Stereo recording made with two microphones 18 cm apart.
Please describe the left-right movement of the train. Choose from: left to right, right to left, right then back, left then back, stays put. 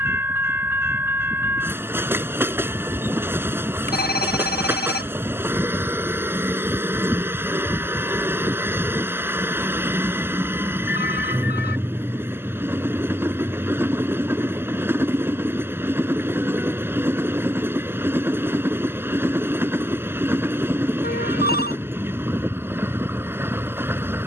stays put.